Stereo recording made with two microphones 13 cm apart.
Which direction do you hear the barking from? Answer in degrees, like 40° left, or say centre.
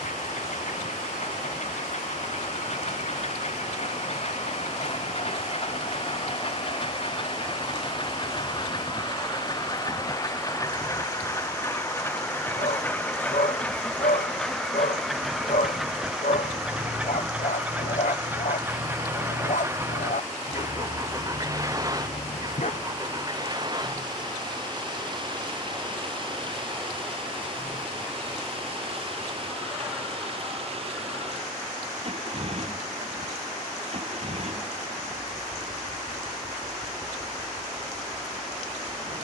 70° left.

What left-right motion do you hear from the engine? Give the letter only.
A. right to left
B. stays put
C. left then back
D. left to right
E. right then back
D.